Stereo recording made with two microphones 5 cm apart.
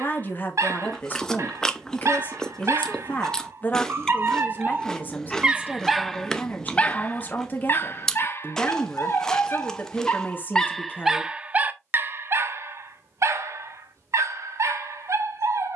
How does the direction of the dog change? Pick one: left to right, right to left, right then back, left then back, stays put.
left then back.